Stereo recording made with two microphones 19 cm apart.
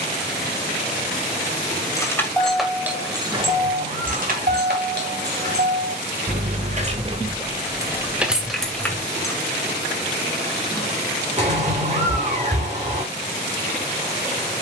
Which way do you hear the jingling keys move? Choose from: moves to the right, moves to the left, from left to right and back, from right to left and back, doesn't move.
from left to right and back.